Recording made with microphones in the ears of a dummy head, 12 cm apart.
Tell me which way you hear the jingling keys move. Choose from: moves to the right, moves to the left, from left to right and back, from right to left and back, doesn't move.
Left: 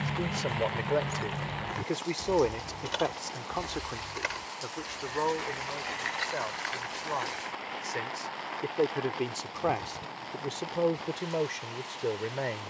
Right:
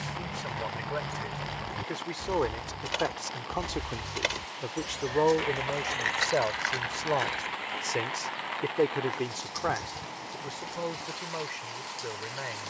moves to the right.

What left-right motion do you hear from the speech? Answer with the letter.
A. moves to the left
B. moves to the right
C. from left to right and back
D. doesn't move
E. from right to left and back
C.